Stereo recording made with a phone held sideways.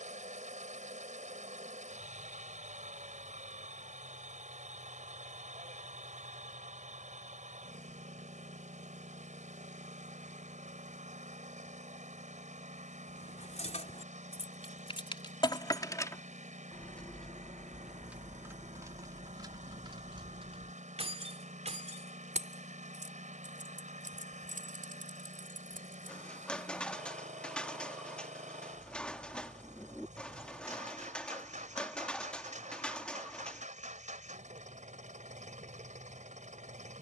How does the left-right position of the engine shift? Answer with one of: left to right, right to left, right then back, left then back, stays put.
stays put.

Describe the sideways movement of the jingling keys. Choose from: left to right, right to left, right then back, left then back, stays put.
left to right.